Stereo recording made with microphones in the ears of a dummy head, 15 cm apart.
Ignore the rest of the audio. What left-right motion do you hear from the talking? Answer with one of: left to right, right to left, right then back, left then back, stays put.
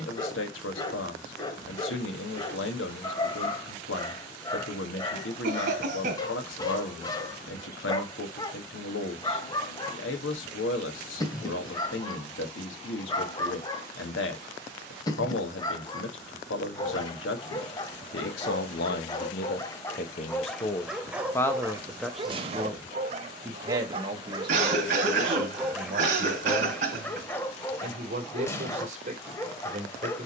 left to right.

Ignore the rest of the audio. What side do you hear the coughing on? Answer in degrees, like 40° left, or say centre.
50° right.